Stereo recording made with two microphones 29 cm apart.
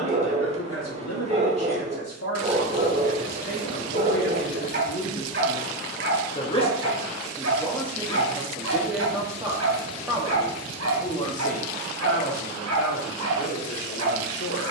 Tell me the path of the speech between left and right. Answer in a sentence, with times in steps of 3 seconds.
In this clip you hear the speech on the left from 0 s, in the centre from 6 s and on the left from 12 s.